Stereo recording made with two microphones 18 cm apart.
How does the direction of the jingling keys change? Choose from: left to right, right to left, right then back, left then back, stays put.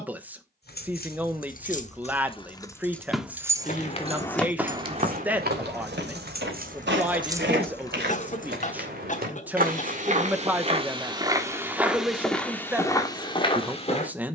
right then back.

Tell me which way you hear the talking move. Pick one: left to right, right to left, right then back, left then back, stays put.
stays put.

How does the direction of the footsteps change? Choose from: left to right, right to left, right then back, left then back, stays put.
right then back.